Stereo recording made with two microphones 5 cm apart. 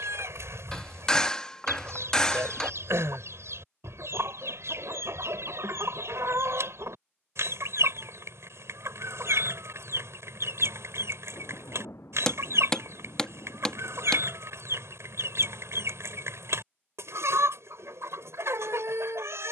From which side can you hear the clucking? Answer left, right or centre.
right.